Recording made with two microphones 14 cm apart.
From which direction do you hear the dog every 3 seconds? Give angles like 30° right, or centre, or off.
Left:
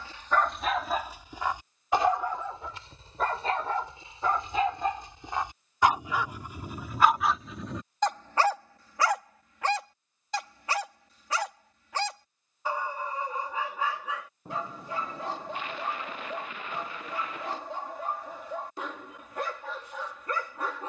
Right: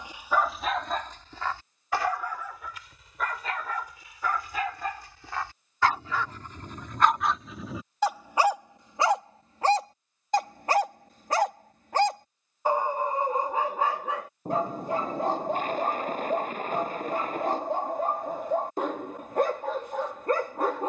10° left, 30° left, centre, 40° right, 50° right, 50° right, 50° right.